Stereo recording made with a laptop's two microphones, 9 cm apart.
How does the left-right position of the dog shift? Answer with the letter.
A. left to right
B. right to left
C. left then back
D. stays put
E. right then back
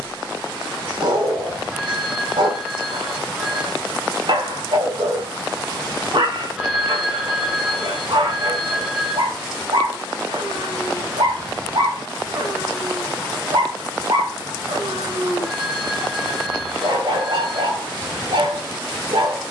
D.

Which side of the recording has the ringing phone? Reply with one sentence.
In this clip you hear the ringing phone in the centre.